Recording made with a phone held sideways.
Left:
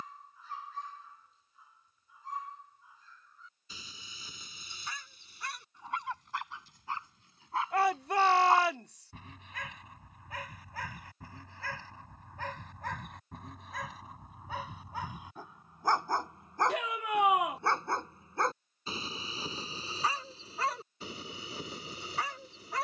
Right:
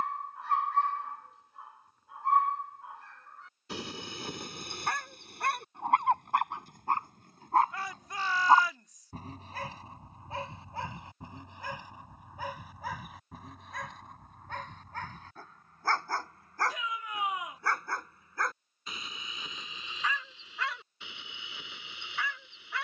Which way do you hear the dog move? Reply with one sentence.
You can hear the dog travel towards the left.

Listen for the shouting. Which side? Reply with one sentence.
You can hear the shouting on the left.